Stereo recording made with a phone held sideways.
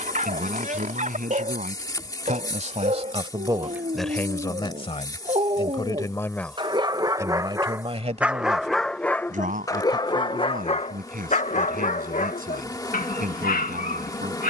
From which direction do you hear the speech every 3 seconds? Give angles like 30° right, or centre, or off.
60° right, 10° left, 20° right, 70° right, 70° right.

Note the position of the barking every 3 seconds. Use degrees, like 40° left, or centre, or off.
60° right, 50° right, 20° right, 40° left, 70° left.